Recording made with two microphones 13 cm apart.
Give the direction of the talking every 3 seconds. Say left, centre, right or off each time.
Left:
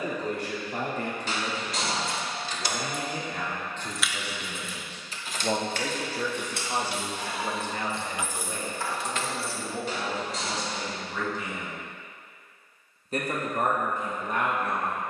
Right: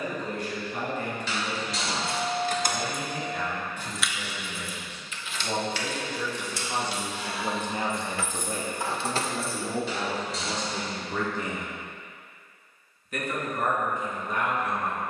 left, left, centre, right, left.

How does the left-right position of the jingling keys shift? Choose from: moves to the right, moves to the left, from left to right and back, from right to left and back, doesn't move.
from right to left and back.